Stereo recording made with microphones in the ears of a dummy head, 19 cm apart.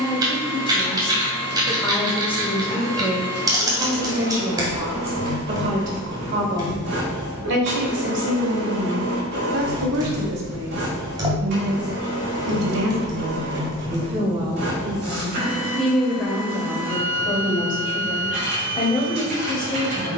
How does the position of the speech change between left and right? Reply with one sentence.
In this clip you hear the speech go right and come back.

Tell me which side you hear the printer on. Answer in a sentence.
In this clip you hear the printer on the right.